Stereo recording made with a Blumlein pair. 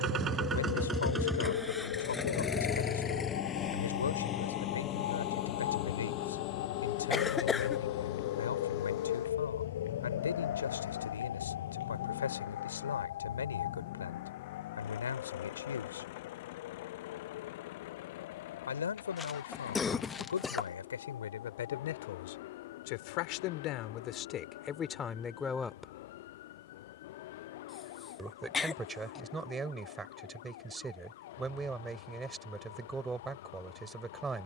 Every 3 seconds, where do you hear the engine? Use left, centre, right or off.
centre, left, left, left, left, left, left, left, left, left, left, left.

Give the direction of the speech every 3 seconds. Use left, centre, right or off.
left, left, left, left, left, left, left, left, left, centre, centre, centre.